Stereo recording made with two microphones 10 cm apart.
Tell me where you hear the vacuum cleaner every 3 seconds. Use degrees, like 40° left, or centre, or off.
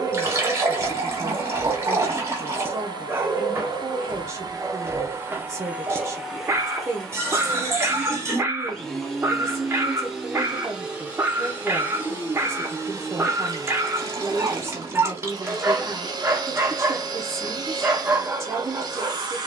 40° right, 30° right, centre, 10° right, 30° right, 40° right, 40° right.